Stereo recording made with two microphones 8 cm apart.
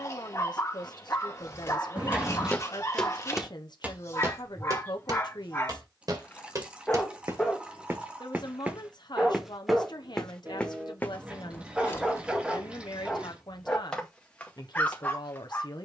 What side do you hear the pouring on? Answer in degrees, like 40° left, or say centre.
10° right.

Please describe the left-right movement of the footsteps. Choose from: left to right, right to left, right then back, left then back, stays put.
right then back.